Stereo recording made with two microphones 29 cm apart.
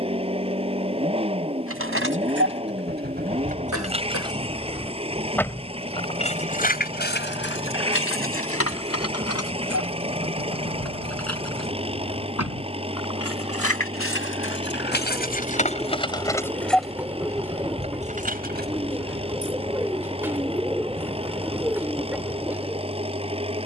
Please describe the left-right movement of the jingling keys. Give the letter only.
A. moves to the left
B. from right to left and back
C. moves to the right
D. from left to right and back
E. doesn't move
B.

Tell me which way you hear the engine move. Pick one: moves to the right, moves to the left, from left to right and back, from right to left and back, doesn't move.
doesn't move.